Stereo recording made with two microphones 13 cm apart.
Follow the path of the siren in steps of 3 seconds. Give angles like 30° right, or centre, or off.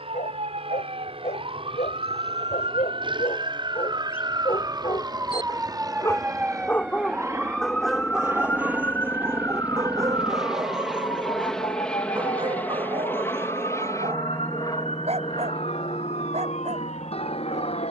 50° right, 30° right, centre, 30° left, 50° left, 60° left.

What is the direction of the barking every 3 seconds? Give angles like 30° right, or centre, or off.
60° left, 40° left, centre, 30° right, 50° right, 60° right.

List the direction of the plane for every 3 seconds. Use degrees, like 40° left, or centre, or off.
50° right, 40° right, 20° right, centre, 20° left, 40° left.